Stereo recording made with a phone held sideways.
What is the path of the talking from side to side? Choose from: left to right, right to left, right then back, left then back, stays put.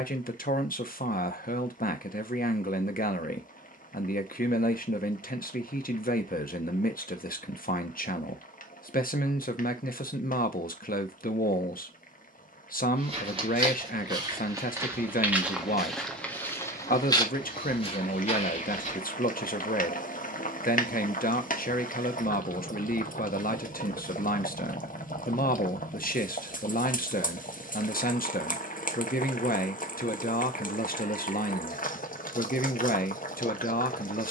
stays put.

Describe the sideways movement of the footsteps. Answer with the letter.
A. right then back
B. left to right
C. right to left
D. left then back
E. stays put
C.